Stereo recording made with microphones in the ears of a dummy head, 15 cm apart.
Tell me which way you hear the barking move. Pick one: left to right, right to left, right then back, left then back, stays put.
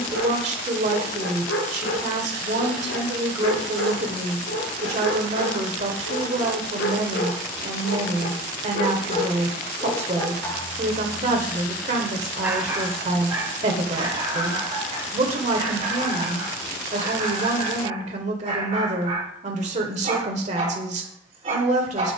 left to right.